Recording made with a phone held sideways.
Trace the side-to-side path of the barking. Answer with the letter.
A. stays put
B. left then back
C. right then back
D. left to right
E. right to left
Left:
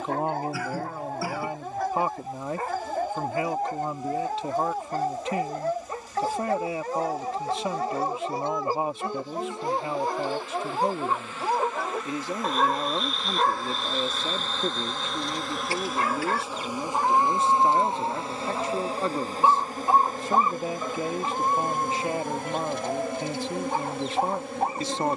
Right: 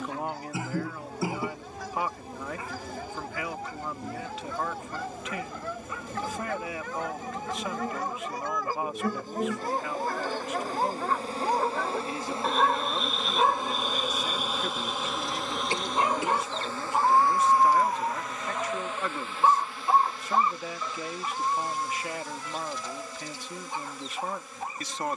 C.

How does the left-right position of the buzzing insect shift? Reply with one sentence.
In this clip you hear the buzzing insect go from the right side to the left.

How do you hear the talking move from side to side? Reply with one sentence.
You can hear the talking stay put.